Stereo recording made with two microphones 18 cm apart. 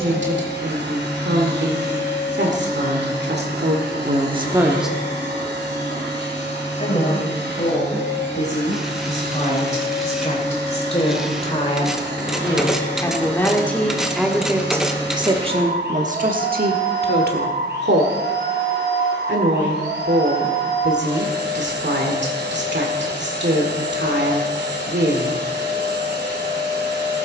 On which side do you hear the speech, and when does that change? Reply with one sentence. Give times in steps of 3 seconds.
You can hear the speech on the right from 0 s, on the left from 6 s, in the centre from 12 s and on the right from 15 s.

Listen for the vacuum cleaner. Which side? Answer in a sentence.
You can hear the vacuum cleaner on the right.